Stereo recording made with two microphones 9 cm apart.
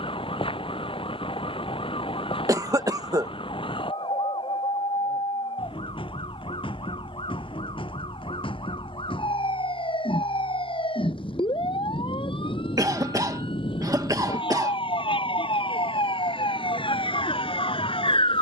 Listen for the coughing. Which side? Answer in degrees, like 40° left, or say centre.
40° right.